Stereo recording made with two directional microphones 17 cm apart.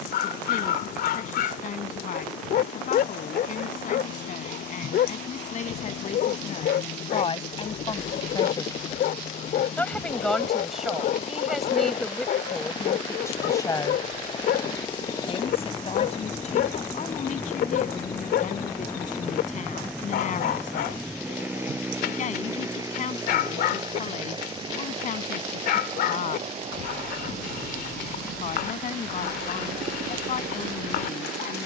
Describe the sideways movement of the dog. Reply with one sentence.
You can hear the dog stay in one place.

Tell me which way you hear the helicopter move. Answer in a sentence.
In this clip you hear the helicopter move to the right.